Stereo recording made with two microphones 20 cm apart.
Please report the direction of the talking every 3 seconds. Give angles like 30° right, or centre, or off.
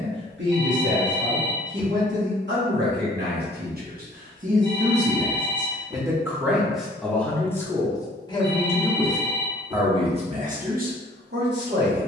70° right, 40° right, 10° left, 40° right.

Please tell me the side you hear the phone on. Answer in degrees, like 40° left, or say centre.
20° right.